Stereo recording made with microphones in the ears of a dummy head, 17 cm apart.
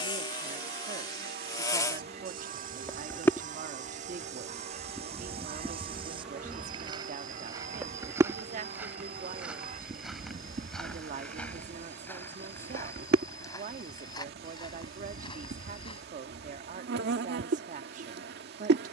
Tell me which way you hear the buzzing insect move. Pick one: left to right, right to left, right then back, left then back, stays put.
left to right.